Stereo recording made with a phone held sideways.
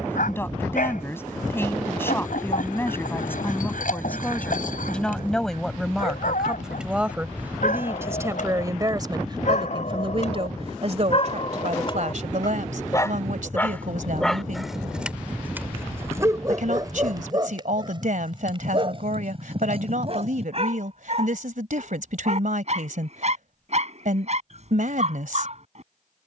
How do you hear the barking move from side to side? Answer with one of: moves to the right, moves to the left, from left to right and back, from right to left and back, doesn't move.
moves to the right.